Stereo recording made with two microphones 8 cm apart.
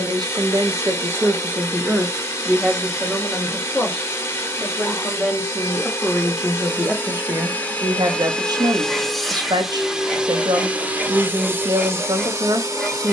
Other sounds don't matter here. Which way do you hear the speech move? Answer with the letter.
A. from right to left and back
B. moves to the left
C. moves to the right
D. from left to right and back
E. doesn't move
A.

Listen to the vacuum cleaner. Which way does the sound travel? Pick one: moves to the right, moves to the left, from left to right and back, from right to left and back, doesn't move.
moves to the right.